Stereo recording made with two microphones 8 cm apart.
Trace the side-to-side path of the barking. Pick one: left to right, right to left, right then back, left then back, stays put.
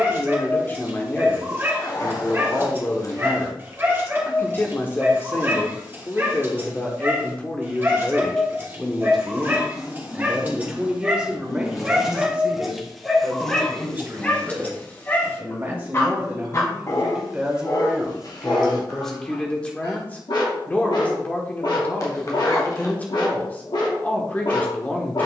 right to left.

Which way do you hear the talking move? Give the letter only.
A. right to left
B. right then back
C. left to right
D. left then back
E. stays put
B.